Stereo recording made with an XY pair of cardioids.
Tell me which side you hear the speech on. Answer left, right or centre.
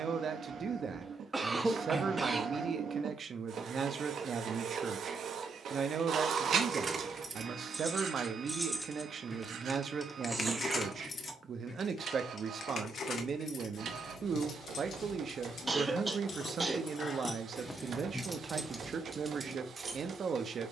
right.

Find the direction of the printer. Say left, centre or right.
right.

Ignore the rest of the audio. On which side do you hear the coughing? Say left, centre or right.
right.